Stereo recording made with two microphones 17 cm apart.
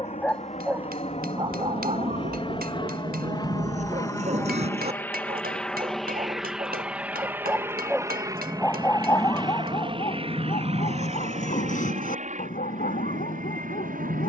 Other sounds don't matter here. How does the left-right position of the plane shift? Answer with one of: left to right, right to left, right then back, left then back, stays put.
left to right.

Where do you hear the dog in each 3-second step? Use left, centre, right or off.
right, right, centre, left, left.